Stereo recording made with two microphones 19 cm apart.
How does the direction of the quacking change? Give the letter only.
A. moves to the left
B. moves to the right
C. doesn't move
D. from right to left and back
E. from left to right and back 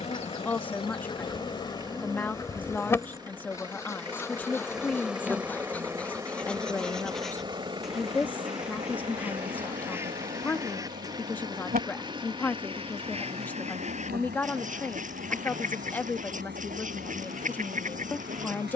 B.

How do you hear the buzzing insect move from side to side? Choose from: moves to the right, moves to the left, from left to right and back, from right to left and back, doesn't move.
moves to the right.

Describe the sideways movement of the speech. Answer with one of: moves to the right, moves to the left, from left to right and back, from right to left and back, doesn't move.
doesn't move.